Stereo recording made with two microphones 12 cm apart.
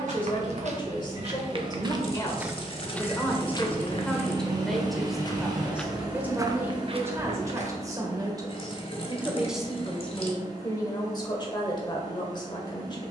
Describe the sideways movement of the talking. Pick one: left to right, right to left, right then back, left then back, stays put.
right then back.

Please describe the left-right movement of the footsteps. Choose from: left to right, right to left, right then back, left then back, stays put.
left then back.